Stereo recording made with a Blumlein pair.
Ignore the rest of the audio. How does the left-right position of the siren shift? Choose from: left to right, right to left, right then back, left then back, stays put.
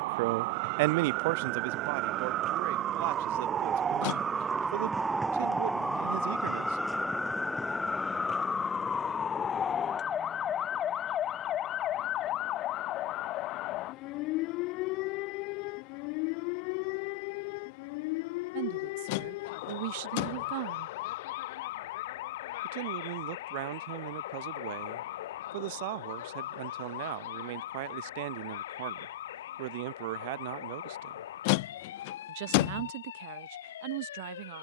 right to left.